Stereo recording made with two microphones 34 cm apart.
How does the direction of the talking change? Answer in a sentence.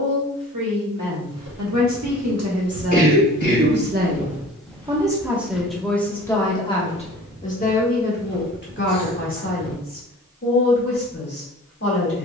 You can hear the talking go from the right side to the left.